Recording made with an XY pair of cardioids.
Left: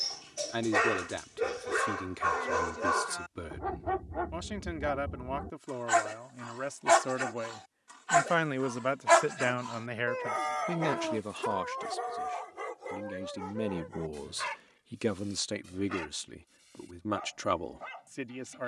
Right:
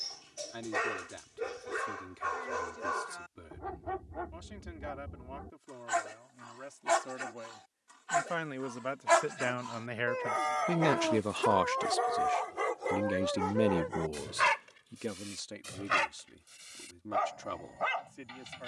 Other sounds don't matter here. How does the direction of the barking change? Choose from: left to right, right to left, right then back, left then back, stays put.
left to right.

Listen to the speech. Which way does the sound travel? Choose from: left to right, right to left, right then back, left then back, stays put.
right then back.